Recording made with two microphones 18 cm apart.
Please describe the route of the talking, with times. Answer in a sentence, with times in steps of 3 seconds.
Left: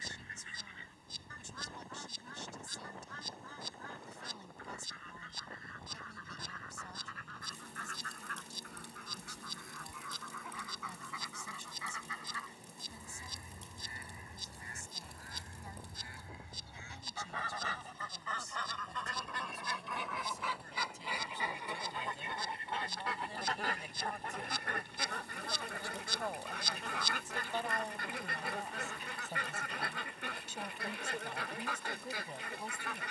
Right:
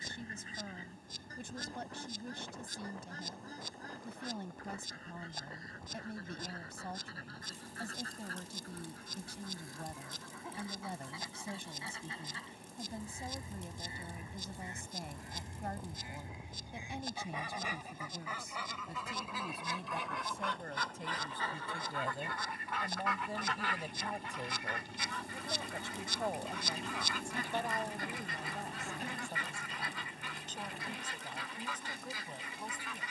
You can hear the talking on the right from 0 s and in the centre from 27 s.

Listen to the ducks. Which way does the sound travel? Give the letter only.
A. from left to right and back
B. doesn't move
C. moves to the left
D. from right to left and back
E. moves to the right
C.